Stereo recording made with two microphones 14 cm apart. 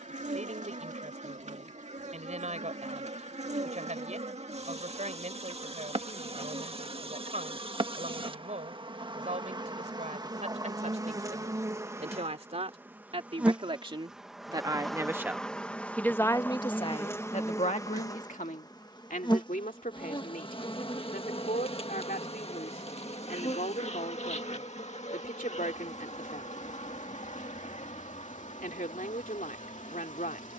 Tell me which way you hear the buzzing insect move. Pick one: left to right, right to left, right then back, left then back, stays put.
right to left.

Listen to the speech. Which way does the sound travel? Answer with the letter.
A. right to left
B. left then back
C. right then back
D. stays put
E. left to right
A.